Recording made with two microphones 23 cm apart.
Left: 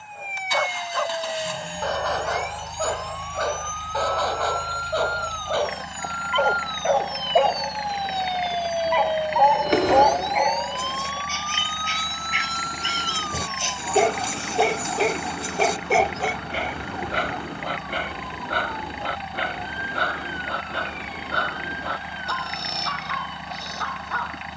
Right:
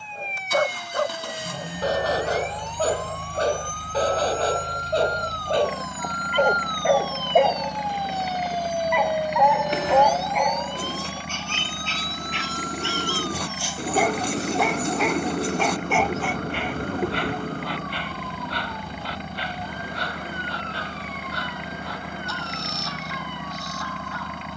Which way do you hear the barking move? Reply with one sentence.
You can hear the barking go from the right side to the left.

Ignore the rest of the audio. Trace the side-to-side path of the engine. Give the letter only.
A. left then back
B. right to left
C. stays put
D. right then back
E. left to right
C.